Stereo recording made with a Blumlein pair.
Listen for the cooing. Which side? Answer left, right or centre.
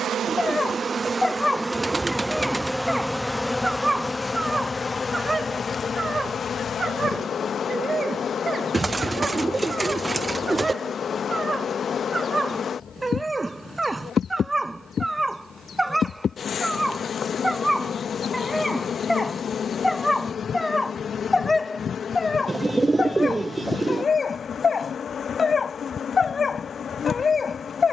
centre.